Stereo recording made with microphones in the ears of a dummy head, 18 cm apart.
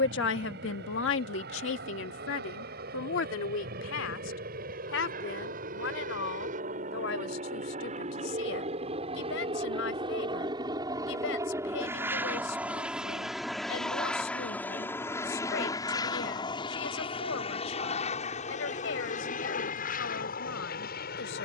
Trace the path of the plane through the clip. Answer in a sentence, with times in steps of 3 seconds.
In this clip you hear the plane on the right from 0 s, in the centre from 12 s and on the left from 15 s.